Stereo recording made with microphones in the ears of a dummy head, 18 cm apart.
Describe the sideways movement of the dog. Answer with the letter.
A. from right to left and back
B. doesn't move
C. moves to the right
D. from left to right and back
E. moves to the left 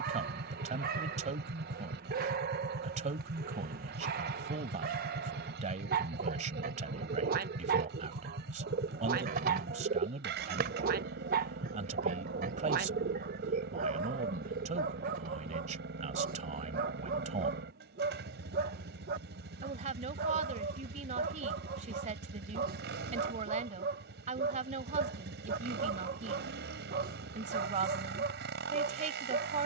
B.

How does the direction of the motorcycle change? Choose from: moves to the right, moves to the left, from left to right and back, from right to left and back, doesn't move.
doesn't move.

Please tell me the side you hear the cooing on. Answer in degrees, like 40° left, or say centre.
50° right.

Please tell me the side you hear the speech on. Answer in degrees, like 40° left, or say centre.
40° right.